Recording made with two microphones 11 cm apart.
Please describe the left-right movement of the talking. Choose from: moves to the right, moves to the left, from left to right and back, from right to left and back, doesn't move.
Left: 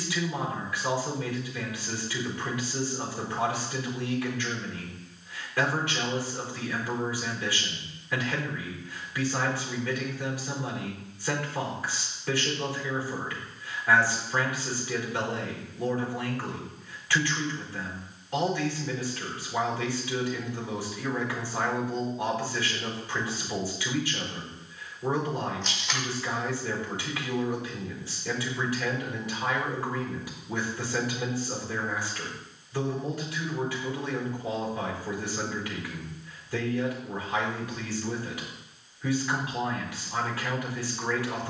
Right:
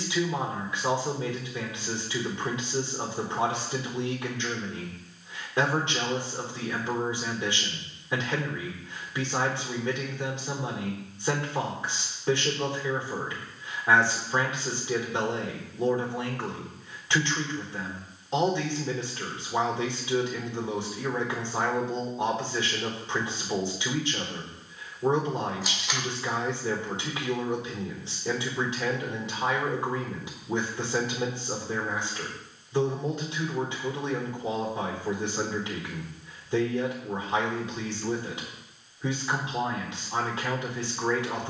doesn't move.